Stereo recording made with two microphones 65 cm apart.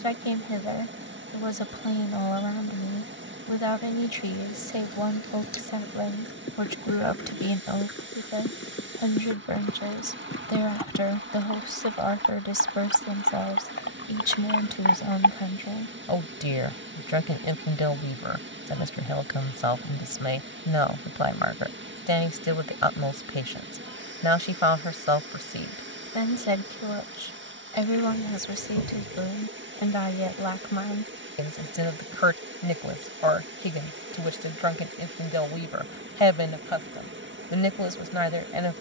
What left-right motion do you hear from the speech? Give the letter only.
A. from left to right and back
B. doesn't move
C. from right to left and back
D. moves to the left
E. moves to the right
B.